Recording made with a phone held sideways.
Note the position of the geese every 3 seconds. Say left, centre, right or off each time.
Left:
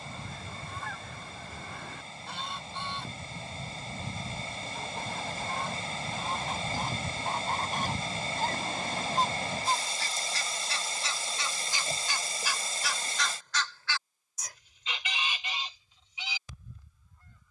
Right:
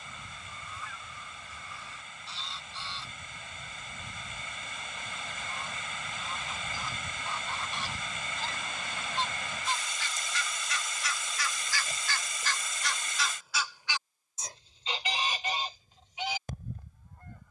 left, left, left, left, centre, right.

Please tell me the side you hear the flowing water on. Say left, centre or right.
left.